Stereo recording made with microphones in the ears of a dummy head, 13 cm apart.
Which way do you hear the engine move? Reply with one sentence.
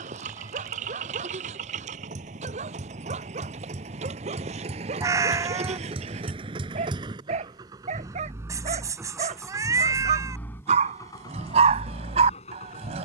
You can hear the engine move from right to left.